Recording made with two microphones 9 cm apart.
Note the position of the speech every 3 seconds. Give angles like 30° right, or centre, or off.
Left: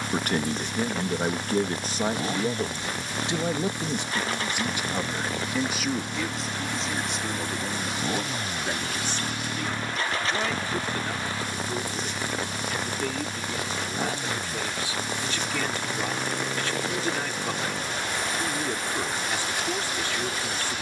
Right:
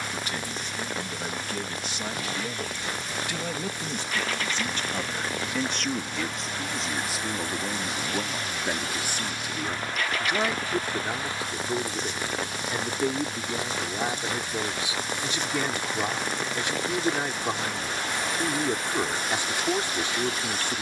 40° left, 10° left, 10° right, 20° right, 20° right, 20° right, 20° right.